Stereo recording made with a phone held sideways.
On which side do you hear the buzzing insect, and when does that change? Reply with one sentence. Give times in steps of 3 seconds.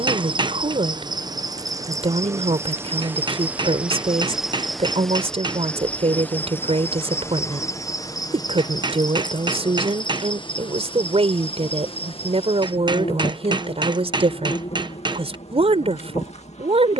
In this clip you hear the buzzing insect on the right from 0 s, in the centre from 3 s and on the left from 6 s.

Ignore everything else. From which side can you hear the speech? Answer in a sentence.
In this clip you hear the speech on the right.